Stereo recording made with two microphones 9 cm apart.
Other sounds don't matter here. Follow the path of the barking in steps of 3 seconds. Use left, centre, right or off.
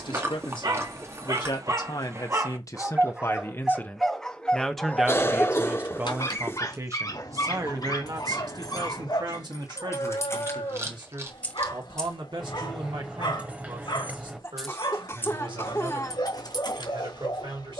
right, centre, left, left, left, left.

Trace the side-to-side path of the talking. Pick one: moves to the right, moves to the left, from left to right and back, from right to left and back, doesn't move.
moves to the right.